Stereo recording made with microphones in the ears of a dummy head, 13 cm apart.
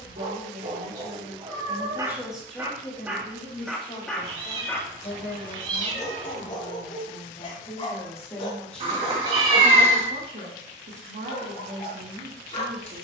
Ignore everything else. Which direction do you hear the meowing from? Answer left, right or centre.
right.